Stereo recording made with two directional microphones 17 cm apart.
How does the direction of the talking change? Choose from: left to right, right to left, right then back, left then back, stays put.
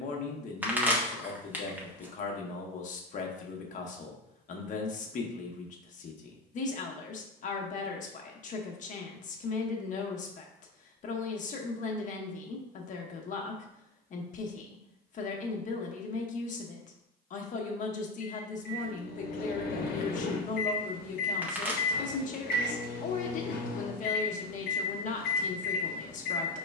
stays put.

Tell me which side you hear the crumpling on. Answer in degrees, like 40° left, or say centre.
10° right.